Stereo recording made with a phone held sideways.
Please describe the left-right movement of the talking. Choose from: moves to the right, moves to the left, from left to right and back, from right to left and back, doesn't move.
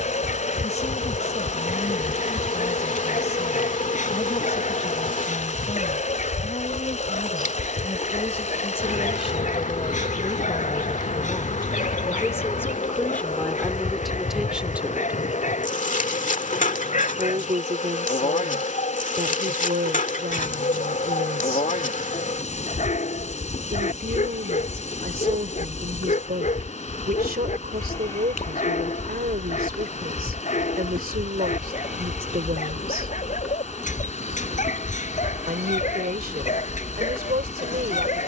moves to the right.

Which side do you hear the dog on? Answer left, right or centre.
left.